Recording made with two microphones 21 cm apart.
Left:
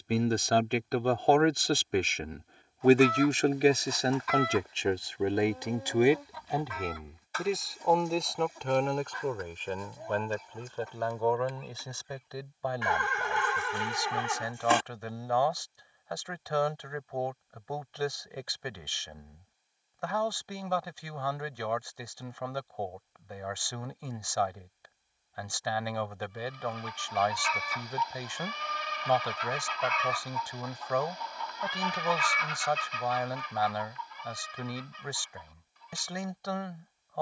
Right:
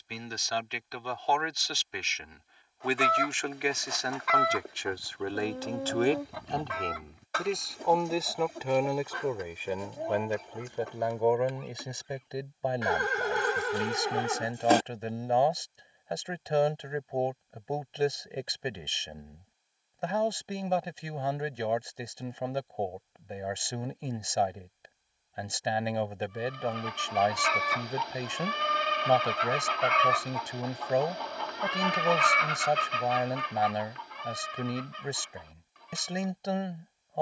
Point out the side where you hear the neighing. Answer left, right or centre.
right.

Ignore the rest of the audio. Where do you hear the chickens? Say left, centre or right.
right.